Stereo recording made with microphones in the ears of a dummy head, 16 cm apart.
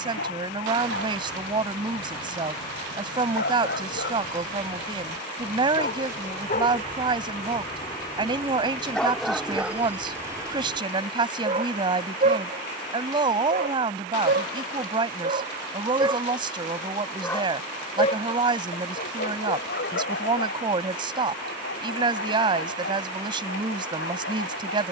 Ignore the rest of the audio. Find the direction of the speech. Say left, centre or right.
right.